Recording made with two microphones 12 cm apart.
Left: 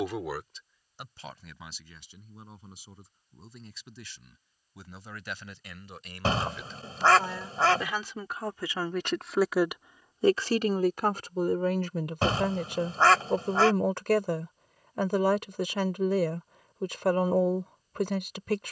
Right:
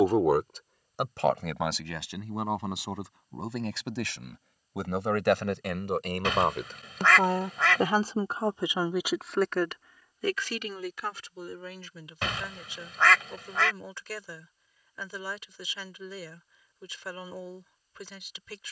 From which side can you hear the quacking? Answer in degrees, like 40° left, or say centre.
30° left.